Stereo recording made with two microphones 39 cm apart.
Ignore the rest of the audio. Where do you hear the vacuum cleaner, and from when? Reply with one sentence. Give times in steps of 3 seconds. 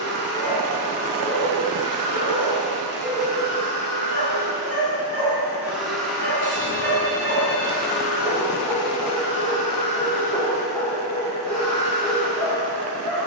In this clip you hear the vacuum cleaner on the right from 0 s, in the centre from 6 s and on the right from 9 s.